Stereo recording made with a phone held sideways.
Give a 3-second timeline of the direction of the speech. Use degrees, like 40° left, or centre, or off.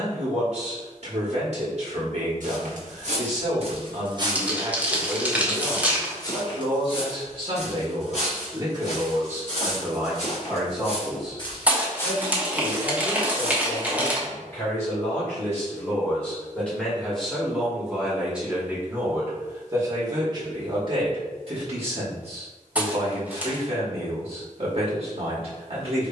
50° right, 50° right, 40° right, 10° right, 10° left, 10° left, 20° right, 50° right, 50° right.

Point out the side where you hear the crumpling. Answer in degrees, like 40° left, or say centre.
10° right.